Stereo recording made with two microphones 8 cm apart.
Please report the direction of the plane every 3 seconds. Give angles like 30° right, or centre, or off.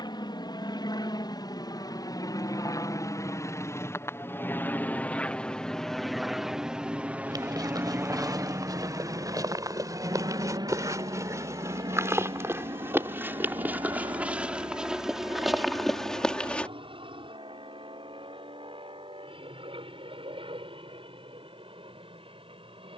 50° left, 20° left, 20° right, 50° right, 60° right, 70° right, 70° right, 70° right.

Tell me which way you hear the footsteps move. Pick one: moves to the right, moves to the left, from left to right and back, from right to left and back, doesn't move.
moves to the left.